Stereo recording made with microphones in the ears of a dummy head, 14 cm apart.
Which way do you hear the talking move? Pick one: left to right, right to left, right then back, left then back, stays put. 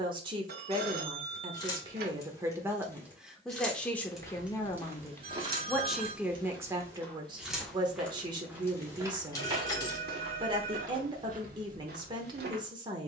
left then back.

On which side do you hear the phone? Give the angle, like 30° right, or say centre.
70° right.